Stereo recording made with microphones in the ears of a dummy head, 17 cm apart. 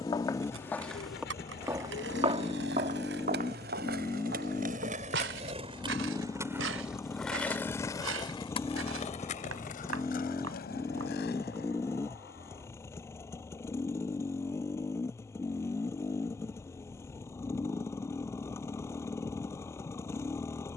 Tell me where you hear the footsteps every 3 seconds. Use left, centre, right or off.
centre, right, right, right, off, off, off.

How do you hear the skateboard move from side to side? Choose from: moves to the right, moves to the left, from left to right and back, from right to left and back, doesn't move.
moves to the left.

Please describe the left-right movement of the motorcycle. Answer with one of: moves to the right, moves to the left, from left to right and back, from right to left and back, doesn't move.
doesn't move.